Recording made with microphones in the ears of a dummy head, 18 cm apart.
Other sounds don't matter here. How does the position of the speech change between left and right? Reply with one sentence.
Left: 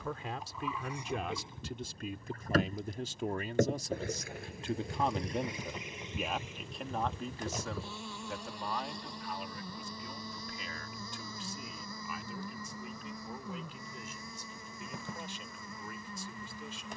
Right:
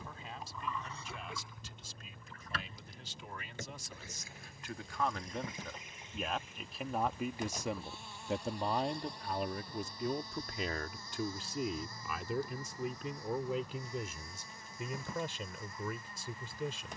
You can hear the speech go from the left side to the right.